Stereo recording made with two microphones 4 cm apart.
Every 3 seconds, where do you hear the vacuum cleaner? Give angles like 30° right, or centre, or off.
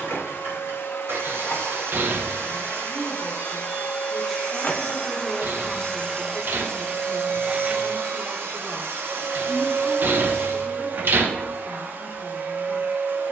70° left, 30° left, 20° right, 50° right, 60° right.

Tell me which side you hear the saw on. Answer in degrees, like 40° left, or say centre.
60° right.